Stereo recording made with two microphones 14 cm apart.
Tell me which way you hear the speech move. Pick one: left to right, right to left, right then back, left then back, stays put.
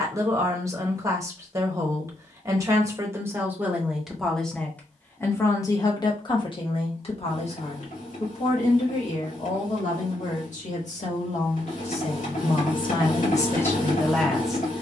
left then back.